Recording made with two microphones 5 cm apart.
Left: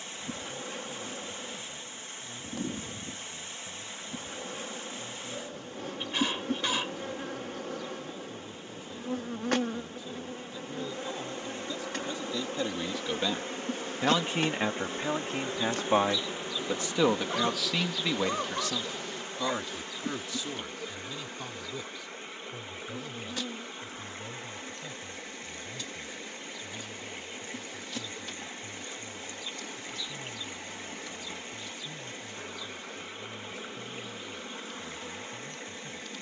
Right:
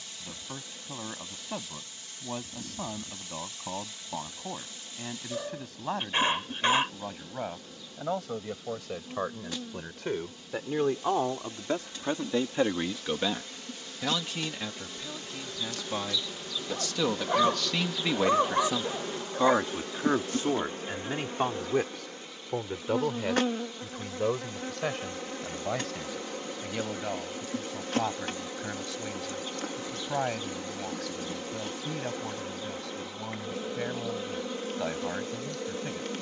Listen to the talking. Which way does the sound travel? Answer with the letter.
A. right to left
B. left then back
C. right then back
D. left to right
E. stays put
B.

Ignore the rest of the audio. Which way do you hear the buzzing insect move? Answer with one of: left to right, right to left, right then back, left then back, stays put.
left to right.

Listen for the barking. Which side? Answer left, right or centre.
right.